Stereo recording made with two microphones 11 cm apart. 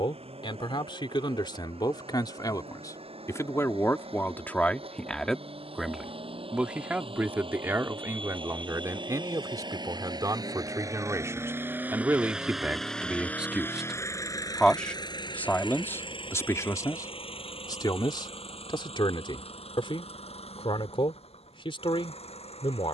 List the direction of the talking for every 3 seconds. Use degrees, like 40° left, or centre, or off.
50° left, 20° left, 20° right, 30° right, 10° right, 30° left, 50° left, 60° left.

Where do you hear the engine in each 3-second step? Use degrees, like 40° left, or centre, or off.
70° right, 70° right, 60° right, 40° right, 20° left, 60° left, 70° left, 80° left.